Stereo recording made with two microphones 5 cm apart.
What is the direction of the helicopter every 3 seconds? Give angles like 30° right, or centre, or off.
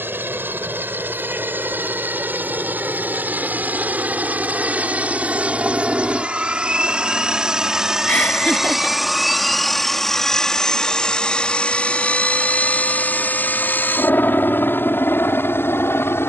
40° right, 30° right, 10° right, 10° left, 40° left, 50° left.